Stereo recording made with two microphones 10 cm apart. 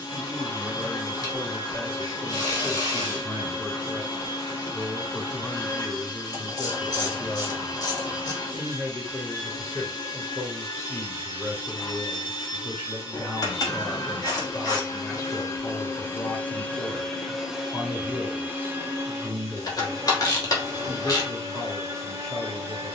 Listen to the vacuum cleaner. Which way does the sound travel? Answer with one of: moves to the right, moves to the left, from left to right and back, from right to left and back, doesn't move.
moves to the right.